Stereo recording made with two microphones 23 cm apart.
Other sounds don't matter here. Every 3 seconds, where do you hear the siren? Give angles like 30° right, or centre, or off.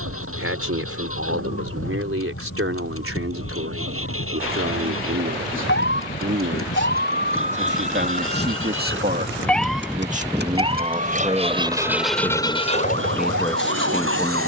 70° left, 60° left, 40° left, 20° right, 60° right.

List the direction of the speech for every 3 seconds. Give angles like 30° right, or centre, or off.
70° right, 70° right, 50° right, 30° right, centre.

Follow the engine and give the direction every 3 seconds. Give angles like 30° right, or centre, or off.
80° right, 70° right, 70° right, 40° right, 40° left.